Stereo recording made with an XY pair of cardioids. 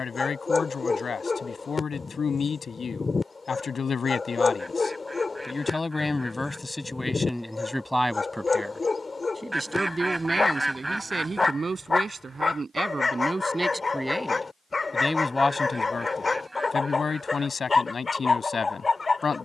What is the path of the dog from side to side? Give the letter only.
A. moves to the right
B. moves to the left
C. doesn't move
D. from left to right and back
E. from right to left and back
C.